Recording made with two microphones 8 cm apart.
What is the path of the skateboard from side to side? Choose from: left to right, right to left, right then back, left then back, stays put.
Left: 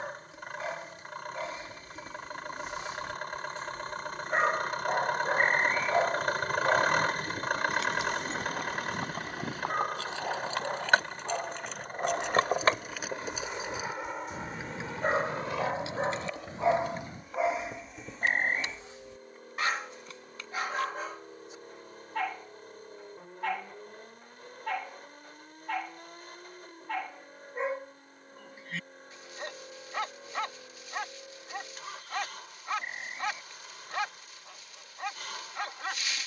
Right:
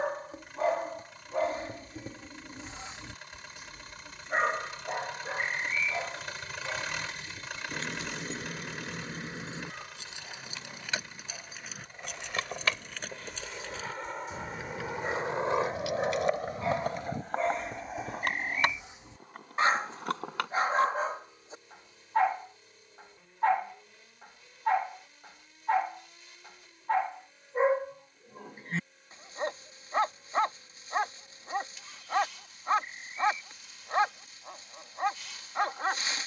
left to right.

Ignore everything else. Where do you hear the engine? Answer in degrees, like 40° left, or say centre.
50° left.